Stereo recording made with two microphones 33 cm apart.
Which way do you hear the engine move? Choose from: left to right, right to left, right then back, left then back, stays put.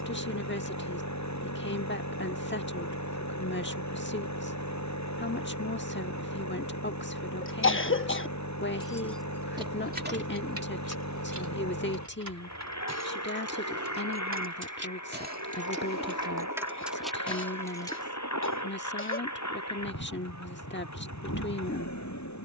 stays put.